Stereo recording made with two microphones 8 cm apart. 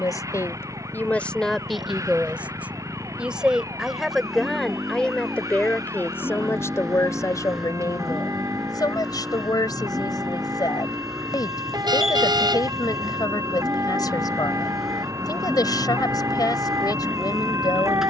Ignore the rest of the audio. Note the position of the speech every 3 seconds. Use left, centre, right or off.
centre, centre, left, left, left, left.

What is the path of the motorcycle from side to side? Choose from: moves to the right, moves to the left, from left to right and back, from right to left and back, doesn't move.
doesn't move.